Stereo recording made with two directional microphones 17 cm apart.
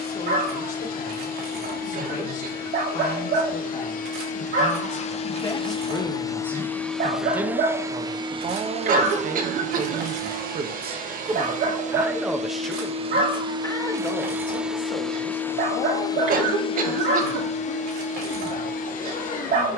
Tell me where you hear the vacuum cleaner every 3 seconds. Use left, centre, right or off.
left, left, centre, right, right, left, left.